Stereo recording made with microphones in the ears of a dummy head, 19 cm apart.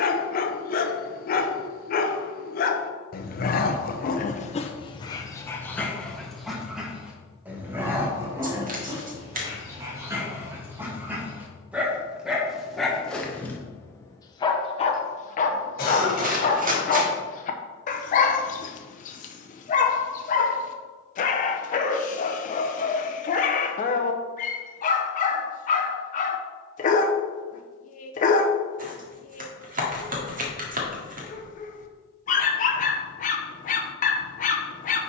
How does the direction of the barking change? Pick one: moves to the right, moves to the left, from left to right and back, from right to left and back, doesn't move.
from left to right and back.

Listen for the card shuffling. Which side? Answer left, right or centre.
right.